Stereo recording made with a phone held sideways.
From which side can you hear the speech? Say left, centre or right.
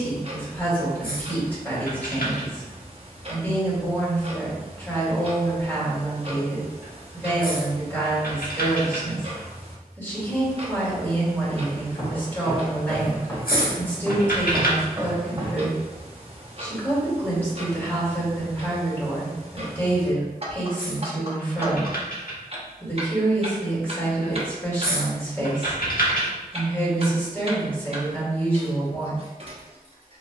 centre.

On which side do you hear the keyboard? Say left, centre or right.
left.